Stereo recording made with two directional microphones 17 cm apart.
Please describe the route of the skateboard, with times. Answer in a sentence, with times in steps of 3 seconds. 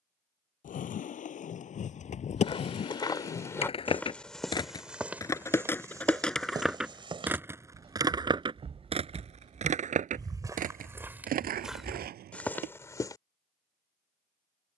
In this clip you hear the skateboard on the left from 0 s, in the centre from 6 s and on the right from 9 s.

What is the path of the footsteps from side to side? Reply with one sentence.
In this clip you hear the footsteps go right and come back.